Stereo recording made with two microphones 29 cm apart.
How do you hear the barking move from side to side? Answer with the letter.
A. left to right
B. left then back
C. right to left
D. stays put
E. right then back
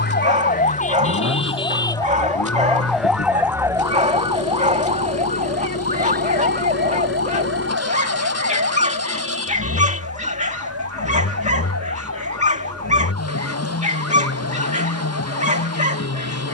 D.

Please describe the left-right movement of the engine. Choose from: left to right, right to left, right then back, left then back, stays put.
stays put.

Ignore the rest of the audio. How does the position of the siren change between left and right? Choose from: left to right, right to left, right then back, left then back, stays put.
left to right.